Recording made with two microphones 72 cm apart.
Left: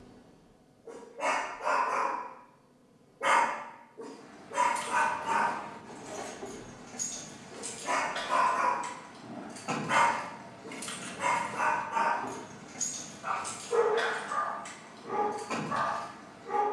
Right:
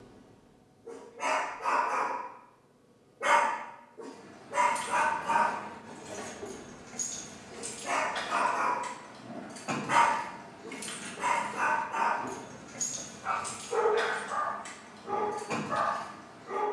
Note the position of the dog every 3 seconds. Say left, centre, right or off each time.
right, right, centre, left, left, left.